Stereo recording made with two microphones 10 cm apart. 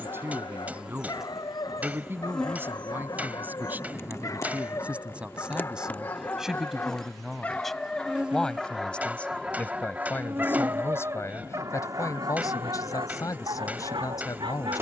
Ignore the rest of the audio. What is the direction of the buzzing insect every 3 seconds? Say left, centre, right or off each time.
centre, left, centre, right, right.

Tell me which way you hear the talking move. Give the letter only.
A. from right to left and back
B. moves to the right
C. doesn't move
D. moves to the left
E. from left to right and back
D.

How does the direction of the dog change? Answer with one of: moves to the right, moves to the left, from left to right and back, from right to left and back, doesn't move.
moves to the right.